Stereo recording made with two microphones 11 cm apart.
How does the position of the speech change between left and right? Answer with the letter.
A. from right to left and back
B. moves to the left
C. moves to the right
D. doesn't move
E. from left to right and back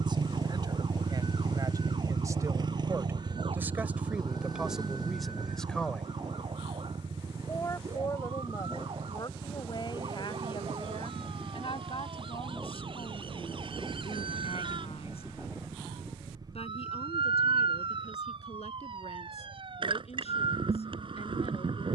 B.